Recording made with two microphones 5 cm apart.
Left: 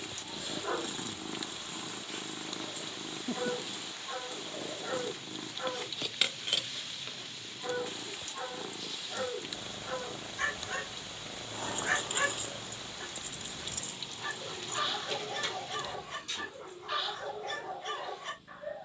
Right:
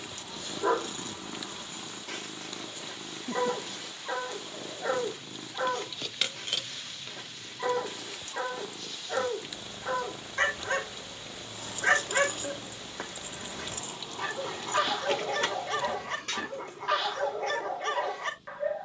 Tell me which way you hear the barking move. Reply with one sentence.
You can hear the barking stay put.